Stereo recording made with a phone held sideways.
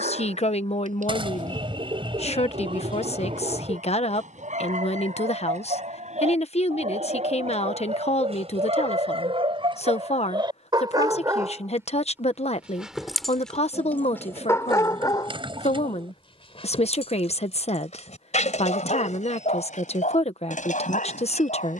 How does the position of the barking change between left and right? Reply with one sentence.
In this clip you hear the barking move to the left.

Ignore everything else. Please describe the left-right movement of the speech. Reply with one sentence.
In this clip you hear the speech stay in one place.